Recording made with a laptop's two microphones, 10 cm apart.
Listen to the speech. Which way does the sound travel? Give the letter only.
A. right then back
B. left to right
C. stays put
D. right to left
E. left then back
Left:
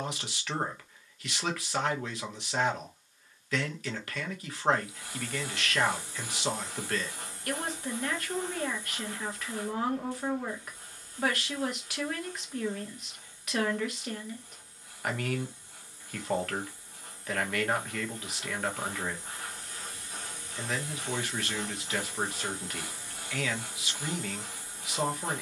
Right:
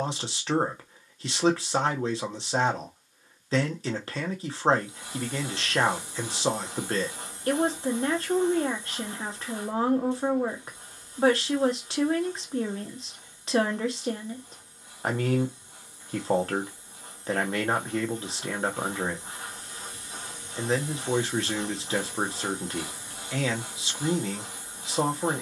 C.